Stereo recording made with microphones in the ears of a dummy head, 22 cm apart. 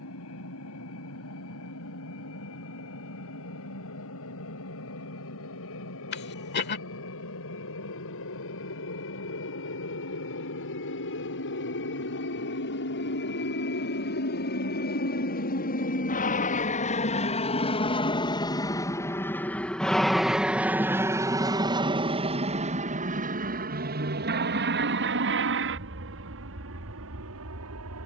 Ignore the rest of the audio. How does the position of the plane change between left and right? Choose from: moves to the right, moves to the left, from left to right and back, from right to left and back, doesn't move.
moves to the right.